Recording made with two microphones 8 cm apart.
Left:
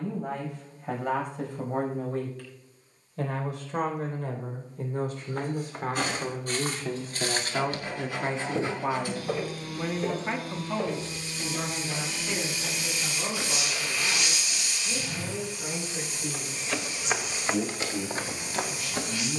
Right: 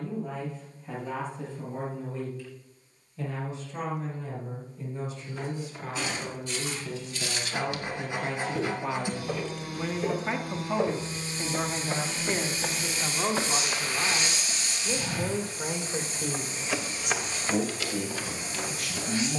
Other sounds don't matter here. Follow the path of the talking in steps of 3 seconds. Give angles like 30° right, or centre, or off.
70° left, 60° left, 40° left, 10° right, 50° right, 60° right, 70° right.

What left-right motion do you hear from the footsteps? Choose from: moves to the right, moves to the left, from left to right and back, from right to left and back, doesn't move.
from left to right and back.